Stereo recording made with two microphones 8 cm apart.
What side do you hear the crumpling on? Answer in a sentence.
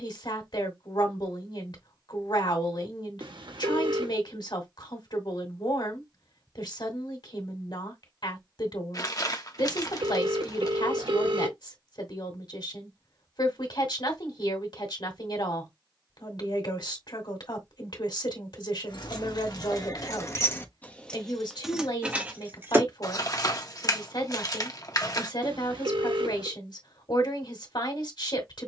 You can hear the crumpling on the left.